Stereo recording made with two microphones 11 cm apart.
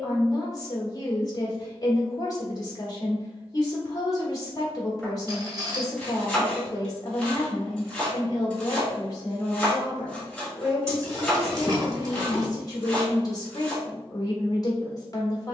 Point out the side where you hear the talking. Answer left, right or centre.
left.